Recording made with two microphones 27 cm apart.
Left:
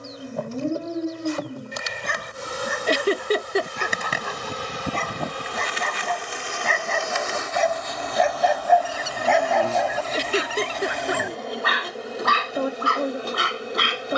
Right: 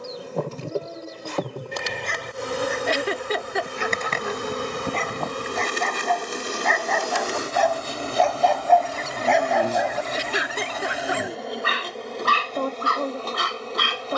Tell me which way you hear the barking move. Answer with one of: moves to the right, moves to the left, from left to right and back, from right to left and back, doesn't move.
moves to the right.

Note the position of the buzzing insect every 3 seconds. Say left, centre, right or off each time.
right, right, right, centre, centre.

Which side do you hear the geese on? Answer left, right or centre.
centre.